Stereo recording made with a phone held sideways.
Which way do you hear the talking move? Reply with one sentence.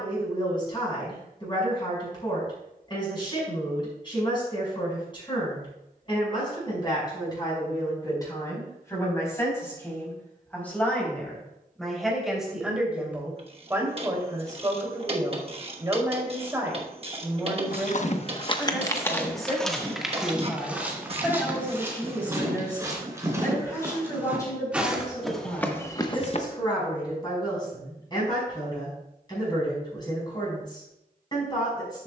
You can hear the talking move from left to right and back again.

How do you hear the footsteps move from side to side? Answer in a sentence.
You can hear the footsteps go right and come back.